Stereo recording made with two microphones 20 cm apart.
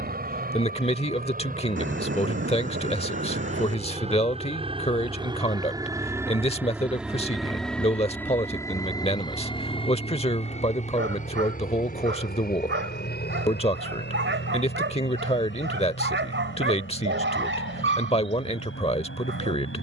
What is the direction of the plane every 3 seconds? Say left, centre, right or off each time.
right, right, centre, left, left, left, left.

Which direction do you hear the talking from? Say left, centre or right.
left.